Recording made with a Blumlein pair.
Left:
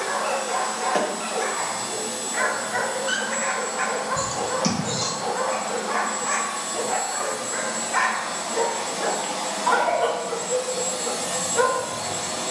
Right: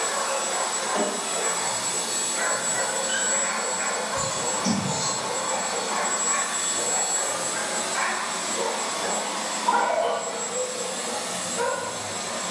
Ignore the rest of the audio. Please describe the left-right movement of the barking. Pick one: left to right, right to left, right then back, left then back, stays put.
stays put.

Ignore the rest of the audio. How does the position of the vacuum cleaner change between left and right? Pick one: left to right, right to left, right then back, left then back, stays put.
right to left.